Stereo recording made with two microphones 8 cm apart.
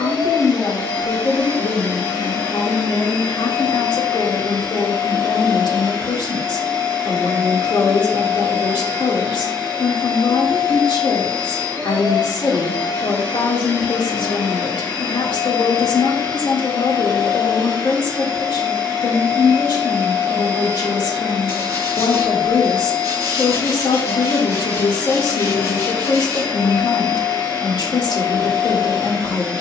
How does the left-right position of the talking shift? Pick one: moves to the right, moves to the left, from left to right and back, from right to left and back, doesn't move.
doesn't move.